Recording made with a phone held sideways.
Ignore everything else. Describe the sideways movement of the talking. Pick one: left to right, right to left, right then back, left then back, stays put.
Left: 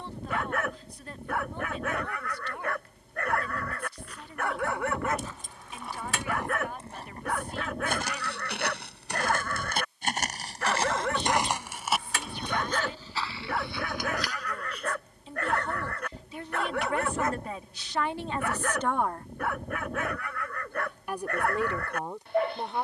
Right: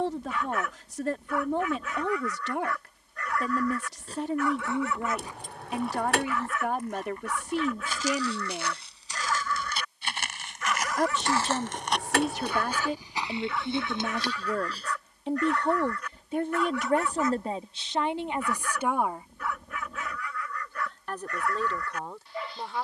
right to left.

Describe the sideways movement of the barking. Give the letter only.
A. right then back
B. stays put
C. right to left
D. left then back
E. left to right
B.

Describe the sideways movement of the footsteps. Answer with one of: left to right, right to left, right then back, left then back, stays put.
left then back.